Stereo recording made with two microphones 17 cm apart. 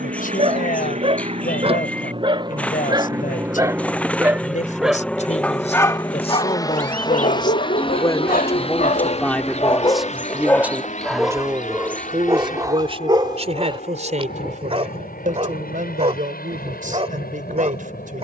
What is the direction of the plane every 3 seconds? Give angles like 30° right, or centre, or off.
40° right, centre, 30° left, 40° left, 50° left, 50° left.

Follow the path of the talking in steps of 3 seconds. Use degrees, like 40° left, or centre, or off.
50° left, 50° left, 30° left, 10° right, 40° right, 50° right.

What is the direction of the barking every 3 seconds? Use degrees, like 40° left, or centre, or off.
30° right, centre, 50° left, 10° left, 30° right, 40° right.